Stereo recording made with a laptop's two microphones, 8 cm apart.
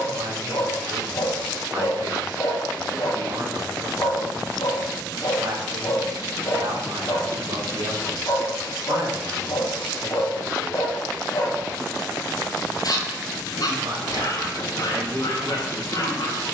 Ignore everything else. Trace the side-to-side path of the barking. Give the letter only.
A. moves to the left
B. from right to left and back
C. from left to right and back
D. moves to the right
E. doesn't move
E.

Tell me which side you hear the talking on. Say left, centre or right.
right.